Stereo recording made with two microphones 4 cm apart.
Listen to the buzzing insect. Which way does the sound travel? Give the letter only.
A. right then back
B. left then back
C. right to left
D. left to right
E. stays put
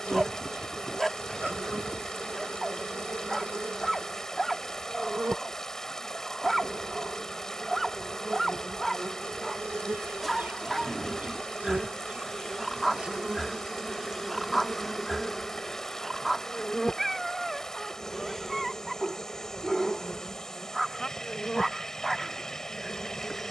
C.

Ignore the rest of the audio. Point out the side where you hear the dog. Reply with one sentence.
In this clip you hear the dog in the centre.